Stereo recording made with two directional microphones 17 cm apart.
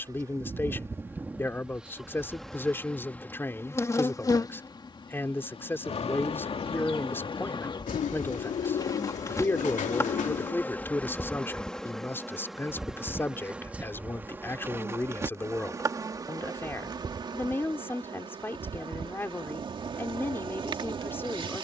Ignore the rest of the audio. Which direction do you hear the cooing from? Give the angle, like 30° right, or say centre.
50° left.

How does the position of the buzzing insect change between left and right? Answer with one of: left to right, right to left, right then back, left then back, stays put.
left then back.